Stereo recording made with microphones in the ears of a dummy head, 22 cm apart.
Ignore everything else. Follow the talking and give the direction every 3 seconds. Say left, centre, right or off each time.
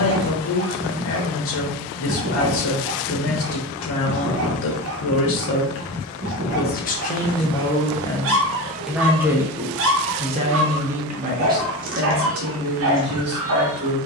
left, left, left, right, right.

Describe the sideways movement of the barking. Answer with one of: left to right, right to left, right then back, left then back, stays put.
stays put.